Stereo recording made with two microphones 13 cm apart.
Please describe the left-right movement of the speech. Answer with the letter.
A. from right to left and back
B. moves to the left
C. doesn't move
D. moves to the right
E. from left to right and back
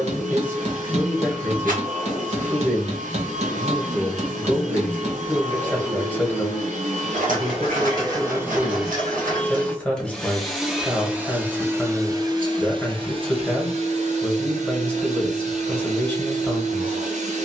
C.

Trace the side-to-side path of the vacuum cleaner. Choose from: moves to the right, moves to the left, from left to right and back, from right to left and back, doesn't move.
from right to left and back.